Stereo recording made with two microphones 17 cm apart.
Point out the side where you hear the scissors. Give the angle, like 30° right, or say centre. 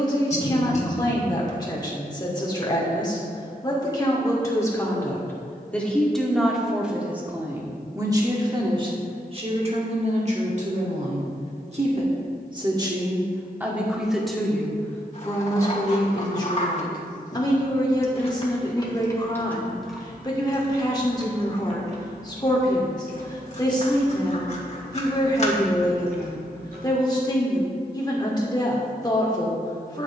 40° left.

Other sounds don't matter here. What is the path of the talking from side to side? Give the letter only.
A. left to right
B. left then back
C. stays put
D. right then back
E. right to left
D.